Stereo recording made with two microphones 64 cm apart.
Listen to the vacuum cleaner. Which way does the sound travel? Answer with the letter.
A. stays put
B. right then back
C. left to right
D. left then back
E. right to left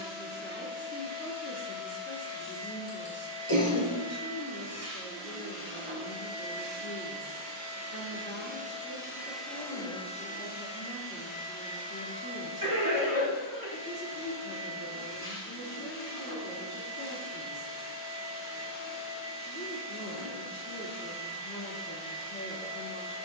E.